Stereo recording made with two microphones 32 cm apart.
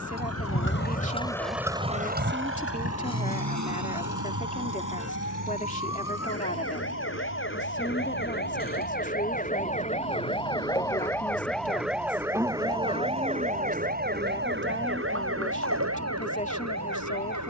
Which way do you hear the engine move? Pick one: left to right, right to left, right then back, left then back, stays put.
left to right.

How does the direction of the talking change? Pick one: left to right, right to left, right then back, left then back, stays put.
stays put.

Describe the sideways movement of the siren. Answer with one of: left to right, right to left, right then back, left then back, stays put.
left to right.